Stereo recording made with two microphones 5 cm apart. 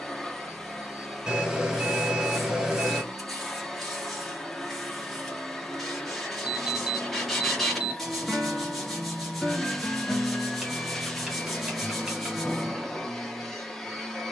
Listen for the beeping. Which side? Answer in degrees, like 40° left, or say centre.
10° right.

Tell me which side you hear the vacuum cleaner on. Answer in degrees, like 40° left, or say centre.
10° left.